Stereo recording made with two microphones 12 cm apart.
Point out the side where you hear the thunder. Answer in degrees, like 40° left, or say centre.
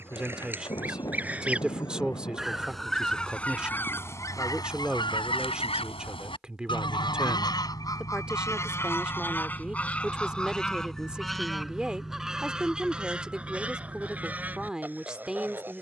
30° left.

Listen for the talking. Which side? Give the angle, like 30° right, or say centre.
10° right.